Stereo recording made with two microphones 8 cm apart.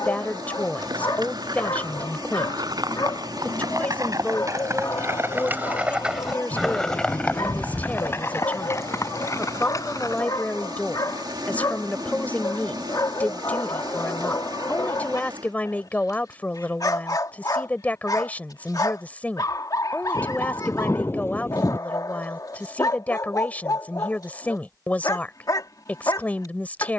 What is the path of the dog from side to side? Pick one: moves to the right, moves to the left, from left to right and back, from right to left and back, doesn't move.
doesn't move.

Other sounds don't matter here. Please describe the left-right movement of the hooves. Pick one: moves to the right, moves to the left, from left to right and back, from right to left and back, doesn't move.
moves to the left.